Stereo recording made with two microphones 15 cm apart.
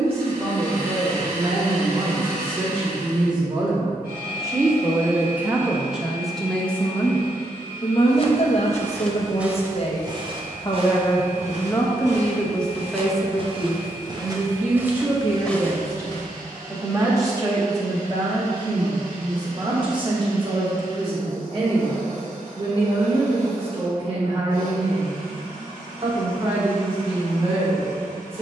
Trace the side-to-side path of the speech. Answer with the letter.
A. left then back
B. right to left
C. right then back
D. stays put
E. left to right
A.